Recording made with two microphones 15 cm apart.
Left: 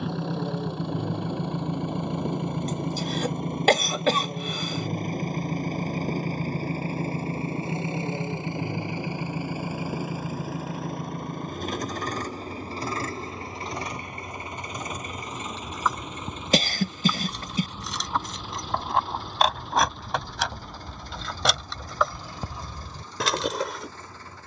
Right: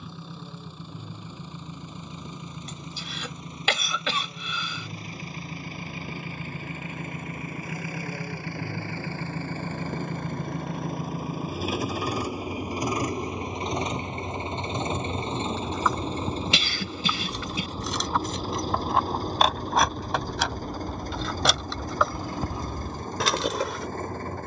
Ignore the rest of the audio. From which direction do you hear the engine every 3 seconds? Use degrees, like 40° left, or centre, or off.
70° left, 50° left, 30° left, centre, 20° right, 30° right, 40° right, 50° right.